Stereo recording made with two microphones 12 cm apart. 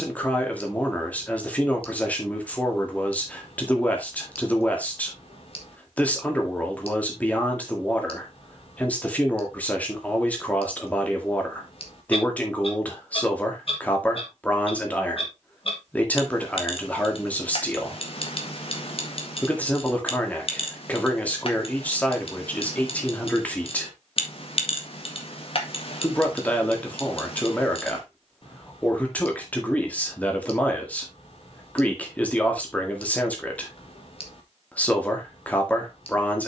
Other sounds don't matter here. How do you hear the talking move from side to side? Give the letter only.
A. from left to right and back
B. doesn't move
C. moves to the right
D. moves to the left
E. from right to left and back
B.